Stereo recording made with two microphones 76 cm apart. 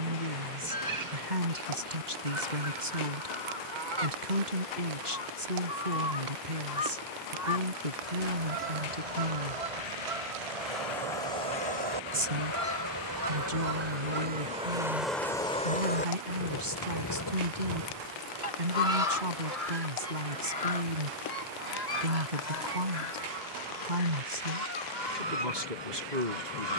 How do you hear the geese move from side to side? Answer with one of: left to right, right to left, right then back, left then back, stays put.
right to left.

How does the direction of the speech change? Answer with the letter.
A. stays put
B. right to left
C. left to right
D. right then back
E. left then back
A.